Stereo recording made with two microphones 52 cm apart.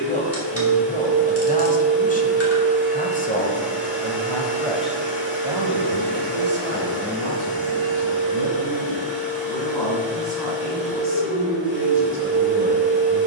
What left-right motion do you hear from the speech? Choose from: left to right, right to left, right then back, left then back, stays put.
left to right.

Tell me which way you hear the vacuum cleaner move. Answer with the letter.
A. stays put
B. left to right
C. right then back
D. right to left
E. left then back
A.